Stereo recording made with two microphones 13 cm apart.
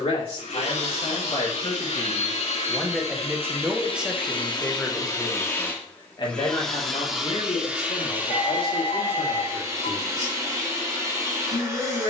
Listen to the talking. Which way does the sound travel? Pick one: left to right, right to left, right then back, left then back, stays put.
right then back.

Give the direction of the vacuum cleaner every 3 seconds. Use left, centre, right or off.
left, left, centre, right.